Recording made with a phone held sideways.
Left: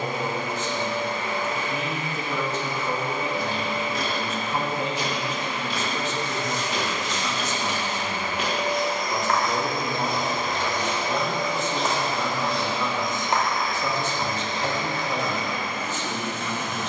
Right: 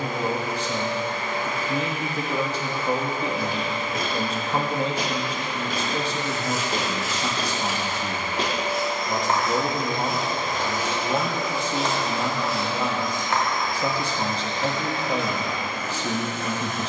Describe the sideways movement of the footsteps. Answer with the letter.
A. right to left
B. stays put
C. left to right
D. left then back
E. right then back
A.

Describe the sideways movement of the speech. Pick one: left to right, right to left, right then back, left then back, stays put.
stays put.